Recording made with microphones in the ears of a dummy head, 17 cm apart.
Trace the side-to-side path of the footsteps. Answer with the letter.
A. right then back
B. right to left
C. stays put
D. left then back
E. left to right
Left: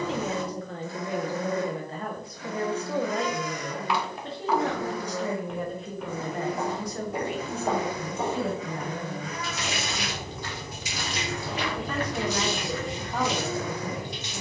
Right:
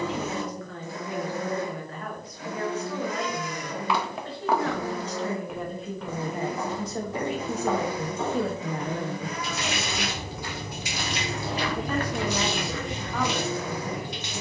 D.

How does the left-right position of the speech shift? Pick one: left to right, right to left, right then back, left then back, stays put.
right then back.